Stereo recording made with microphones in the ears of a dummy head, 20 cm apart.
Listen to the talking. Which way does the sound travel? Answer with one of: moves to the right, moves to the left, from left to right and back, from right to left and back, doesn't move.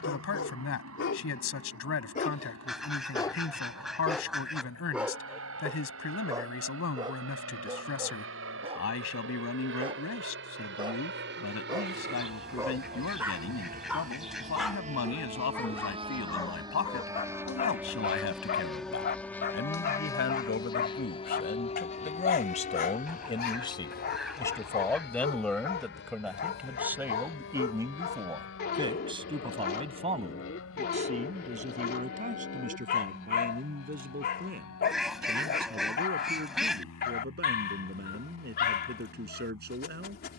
moves to the right.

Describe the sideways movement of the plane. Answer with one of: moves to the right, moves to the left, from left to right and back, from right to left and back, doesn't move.
moves to the left.